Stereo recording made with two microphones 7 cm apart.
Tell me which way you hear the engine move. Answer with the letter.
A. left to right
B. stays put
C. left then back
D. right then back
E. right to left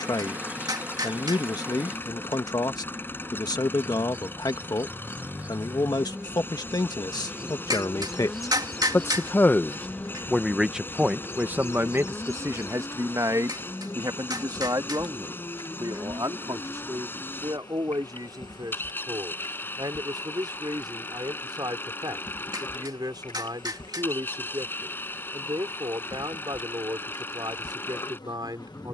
B.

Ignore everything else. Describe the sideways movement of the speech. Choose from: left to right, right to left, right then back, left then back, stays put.
left to right.